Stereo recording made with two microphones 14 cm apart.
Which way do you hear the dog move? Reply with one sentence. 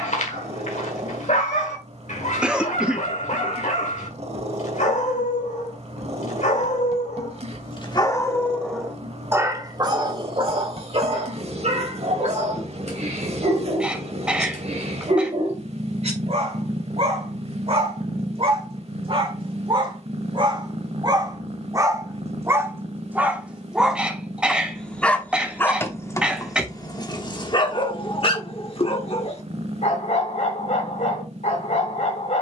In this clip you hear the dog move from left to right and back again.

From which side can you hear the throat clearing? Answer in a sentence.
You can hear the throat clearing in the centre.